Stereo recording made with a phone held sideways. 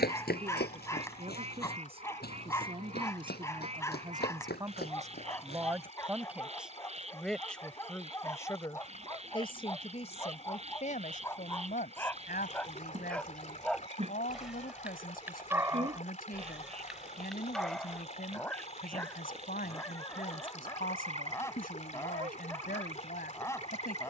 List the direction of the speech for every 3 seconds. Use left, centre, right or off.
right, right, centre, left, left, left, left, left.